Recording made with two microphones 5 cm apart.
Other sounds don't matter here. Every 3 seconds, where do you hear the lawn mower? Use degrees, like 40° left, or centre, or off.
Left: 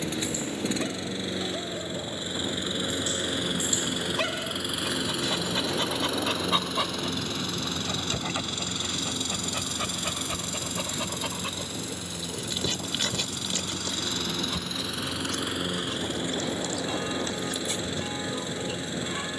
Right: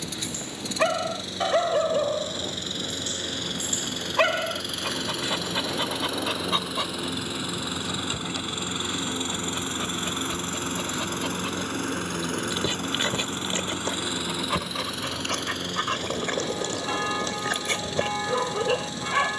20° left, 10° left, 10° right, 40° right, 30° right, 20° left, 20° left.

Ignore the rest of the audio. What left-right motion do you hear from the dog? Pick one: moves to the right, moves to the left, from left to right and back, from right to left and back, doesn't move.
from right to left and back.